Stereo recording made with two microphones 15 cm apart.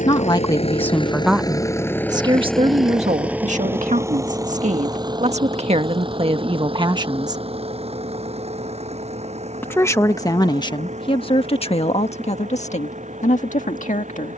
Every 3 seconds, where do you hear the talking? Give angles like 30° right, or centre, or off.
10° right, 50° right, 30° right, 30° left, 50° left.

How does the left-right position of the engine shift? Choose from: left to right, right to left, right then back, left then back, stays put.
left to right.